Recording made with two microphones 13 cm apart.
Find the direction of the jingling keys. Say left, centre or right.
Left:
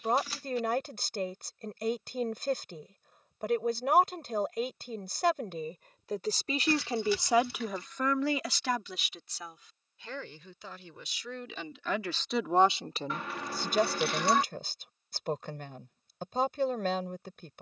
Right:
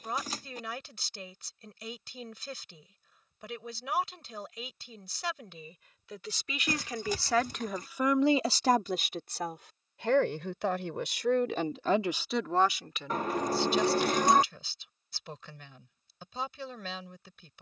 right.